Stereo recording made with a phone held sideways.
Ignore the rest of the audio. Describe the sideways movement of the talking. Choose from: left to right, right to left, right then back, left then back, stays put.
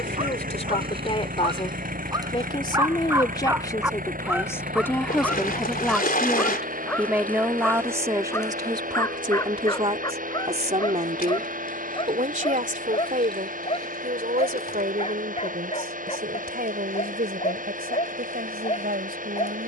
left to right.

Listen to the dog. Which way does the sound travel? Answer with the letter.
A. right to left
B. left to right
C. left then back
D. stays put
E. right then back
A.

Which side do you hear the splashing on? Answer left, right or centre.
left.